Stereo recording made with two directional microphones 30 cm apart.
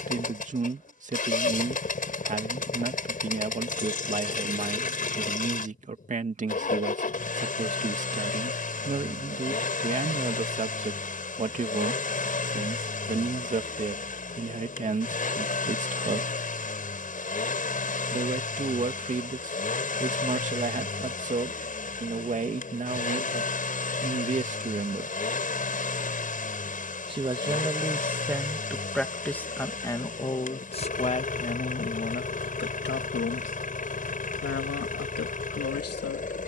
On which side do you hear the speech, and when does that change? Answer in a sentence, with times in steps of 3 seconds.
In this clip you hear the speech on the right from 0 s, in the centre from 27 s and on the left from 30 s.